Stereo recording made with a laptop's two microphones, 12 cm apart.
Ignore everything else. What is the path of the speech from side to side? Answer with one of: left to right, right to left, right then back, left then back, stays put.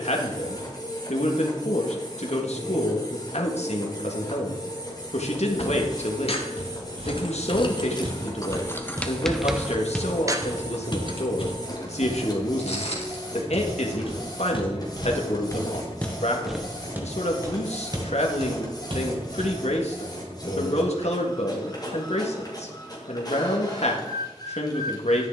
stays put.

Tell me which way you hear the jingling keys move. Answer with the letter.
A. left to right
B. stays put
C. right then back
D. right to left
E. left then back
A.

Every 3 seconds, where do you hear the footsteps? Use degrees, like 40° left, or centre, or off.
off, off, 50° right, 30° left, 60° left, centre, 50° right, off, off.